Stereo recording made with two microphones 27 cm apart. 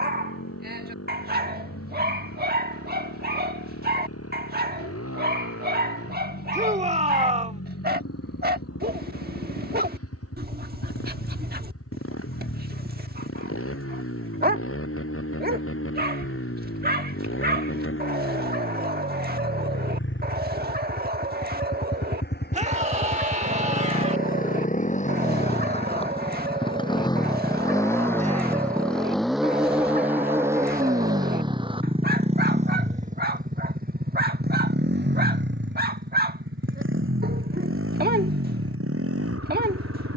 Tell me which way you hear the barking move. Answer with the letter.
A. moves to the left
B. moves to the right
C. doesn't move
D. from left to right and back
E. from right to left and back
C.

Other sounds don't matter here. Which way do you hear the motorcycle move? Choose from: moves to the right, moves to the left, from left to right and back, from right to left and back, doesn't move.
moves to the right.